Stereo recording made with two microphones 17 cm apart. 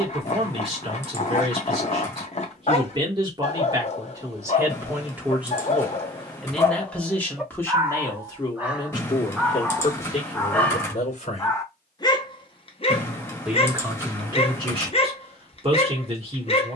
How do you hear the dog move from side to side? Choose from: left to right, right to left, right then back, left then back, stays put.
right then back.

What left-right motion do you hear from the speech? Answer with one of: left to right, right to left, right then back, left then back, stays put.
left then back.